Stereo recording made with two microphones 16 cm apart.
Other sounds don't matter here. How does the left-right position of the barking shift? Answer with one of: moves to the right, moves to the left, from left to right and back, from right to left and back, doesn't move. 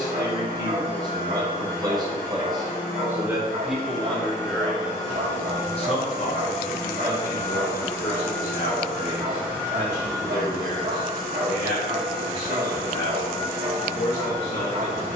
doesn't move.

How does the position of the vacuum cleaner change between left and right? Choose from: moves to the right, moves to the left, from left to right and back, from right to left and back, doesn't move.
moves to the right.